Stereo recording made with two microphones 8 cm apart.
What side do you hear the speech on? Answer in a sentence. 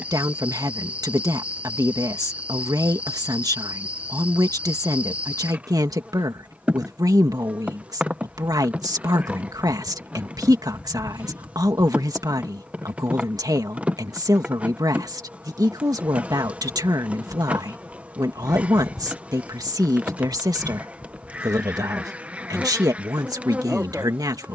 In this clip you hear the speech on the right.